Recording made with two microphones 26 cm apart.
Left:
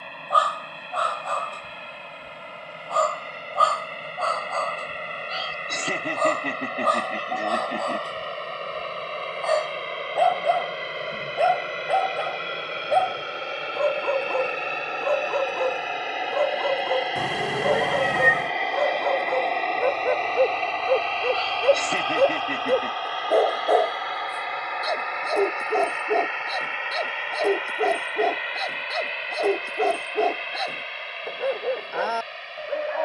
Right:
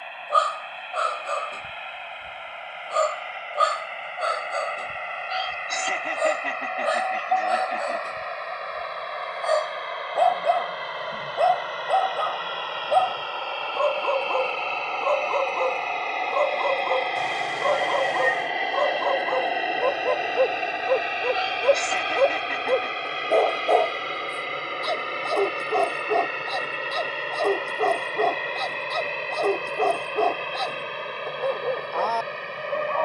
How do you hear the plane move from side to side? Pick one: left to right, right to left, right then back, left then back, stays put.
left to right.